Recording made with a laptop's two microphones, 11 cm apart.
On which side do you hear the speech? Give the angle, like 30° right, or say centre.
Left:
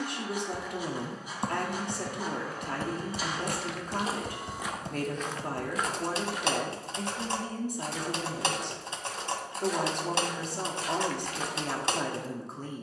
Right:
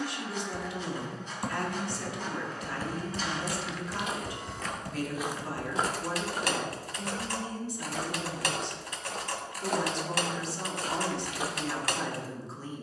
50° left.